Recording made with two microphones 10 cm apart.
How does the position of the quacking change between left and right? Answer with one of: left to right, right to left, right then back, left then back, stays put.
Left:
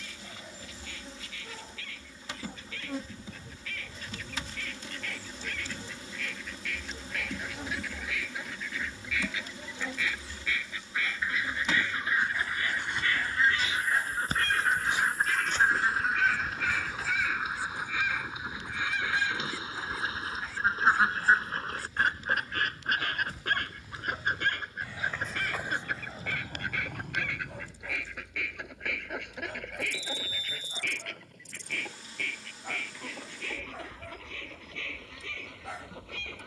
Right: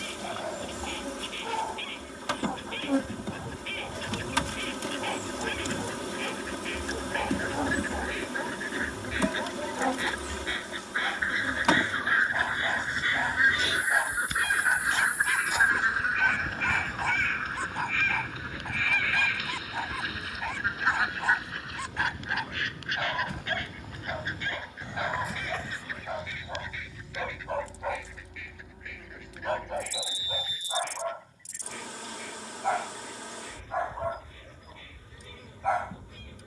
right to left.